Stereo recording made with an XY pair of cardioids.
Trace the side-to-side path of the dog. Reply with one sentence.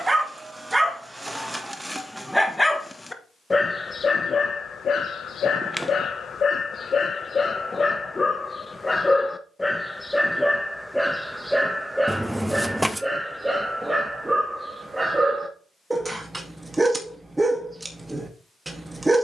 You can hear the dog go left and come back.